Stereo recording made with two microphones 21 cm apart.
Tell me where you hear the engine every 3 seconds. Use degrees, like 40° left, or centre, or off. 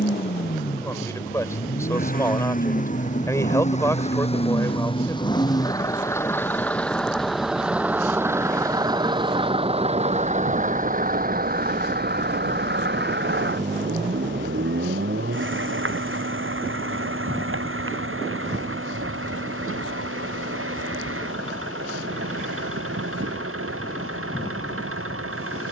40° left, 30° left, centre, 30° right, 60° right, 70° right, 80° right, 80° right, 80° right.